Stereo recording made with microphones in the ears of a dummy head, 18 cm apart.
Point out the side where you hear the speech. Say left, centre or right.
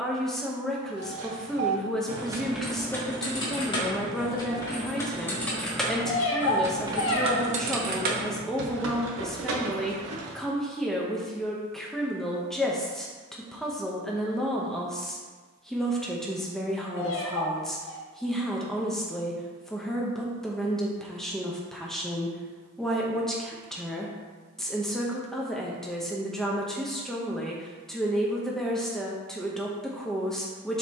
centre.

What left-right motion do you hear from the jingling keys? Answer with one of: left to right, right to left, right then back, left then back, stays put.
left then back.